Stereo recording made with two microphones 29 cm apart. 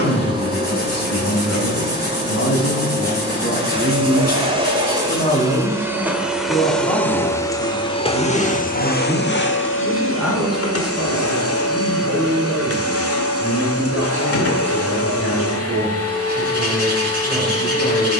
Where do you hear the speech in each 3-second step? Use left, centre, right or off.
left, left, centre, centre, centre, centre.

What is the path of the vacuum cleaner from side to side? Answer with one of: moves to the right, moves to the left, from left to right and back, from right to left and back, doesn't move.
moves to the left.